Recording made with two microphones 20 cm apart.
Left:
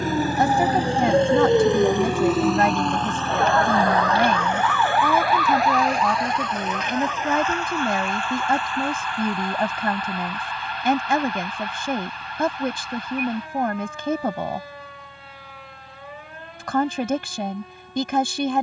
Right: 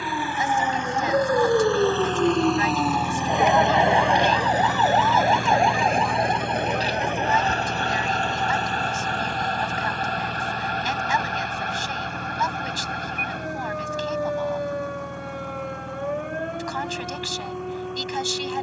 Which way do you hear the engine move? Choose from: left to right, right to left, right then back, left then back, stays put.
left to right.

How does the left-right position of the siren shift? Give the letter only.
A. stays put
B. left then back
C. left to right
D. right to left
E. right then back
C.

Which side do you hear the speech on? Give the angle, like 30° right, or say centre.
60° left.